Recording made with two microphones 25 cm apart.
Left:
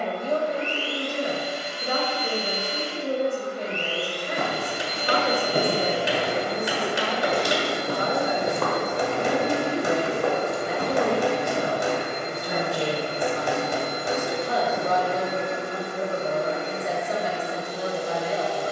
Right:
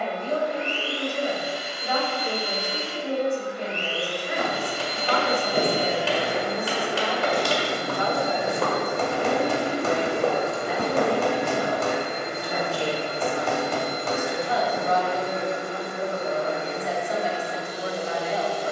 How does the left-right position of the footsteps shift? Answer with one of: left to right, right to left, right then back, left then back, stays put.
left to right.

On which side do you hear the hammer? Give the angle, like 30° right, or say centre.
10° left.